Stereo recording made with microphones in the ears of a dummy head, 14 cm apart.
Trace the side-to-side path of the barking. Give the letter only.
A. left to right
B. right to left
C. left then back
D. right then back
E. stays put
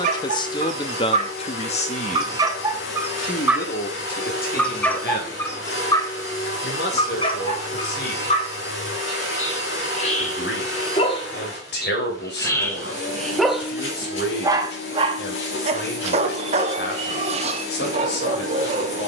C.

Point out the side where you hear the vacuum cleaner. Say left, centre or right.
left.